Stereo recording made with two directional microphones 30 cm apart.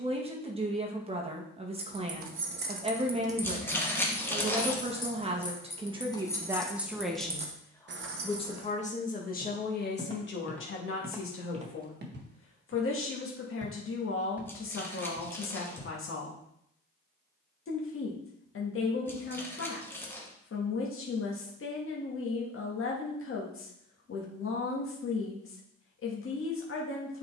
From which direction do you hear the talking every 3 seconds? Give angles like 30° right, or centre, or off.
20° right, 20° right, centre, 40° left, 40° left, 40° left, 40° left, 40° left, 40° left.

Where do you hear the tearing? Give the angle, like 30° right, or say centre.
10° left.